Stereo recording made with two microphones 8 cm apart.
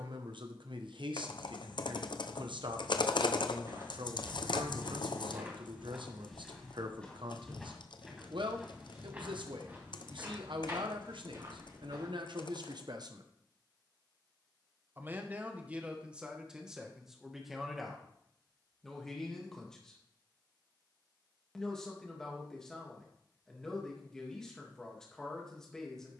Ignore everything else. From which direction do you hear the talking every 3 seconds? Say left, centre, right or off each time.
right, right, right, right, right, centre, centre, centre, centre.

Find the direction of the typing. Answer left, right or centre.
left.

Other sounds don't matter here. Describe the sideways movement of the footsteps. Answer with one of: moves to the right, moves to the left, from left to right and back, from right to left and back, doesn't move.
from right to left and back.